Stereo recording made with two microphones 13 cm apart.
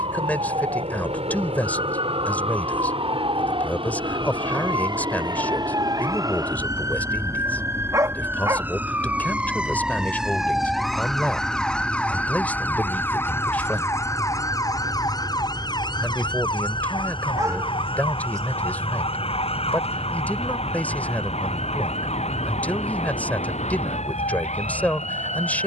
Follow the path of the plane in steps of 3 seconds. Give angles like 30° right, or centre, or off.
60° right, 50° right, 30° right, centre, 20° left, 30° left, 40° left, 40° left, 50° left.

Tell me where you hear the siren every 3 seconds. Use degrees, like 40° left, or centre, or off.
50° right, 40° right, 20° right, centre, 20° left, 40° left, 50° left, 60° left, 70° left.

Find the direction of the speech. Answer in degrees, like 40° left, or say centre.
10° left.